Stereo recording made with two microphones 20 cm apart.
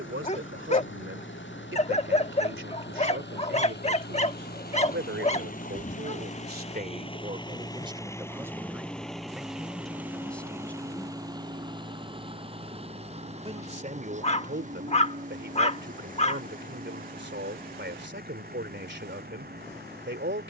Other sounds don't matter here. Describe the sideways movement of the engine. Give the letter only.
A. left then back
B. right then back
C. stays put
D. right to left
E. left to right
E.